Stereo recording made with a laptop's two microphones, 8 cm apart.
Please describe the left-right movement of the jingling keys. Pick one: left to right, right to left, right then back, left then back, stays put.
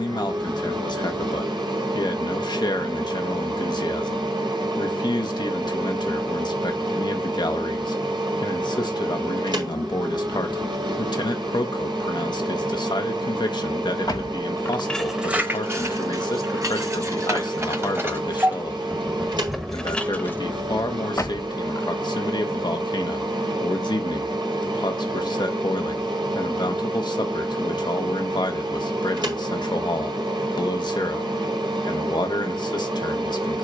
right then back.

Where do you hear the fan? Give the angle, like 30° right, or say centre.
80° right.